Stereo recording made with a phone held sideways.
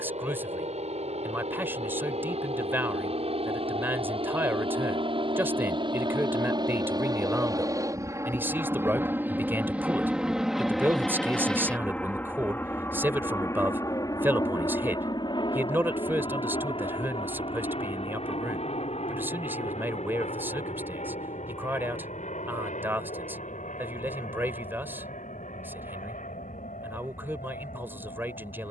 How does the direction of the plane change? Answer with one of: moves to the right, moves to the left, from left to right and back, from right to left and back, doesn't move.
moves to the left.